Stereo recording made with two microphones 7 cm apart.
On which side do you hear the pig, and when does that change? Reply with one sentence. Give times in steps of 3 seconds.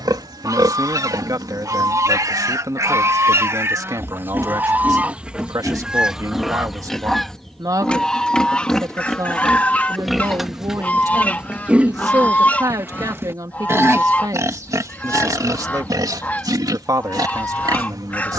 In this clip you hear the pig on the right from 0 s, in the centre from 6 s and on the right from 12 s.